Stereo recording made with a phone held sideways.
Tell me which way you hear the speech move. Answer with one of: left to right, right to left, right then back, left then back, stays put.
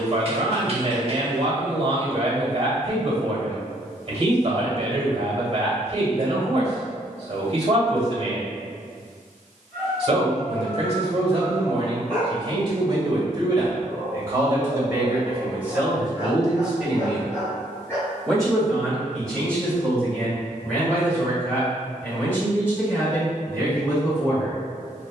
right to left.